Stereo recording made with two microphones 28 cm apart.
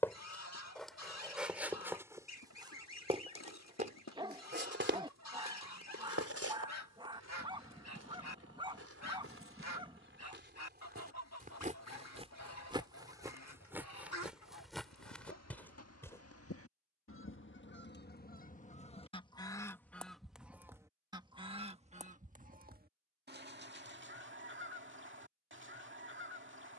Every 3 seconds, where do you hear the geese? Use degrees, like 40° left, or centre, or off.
70° left, 70° left, 70° left, 70° left, 70° left, 50° left, 10° left, 30° right, 40° right.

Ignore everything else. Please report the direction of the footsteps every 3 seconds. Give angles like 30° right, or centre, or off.
centre, 40° right, 60° right, 40° right, 10° right, 10° left, off, off, off.